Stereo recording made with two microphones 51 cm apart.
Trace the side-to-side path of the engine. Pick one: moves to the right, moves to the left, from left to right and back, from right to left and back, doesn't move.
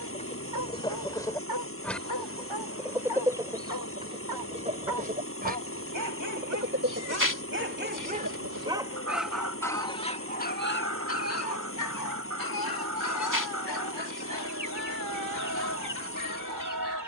doesn't move.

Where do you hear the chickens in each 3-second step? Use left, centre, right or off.
centre, centre, right, right, right, right.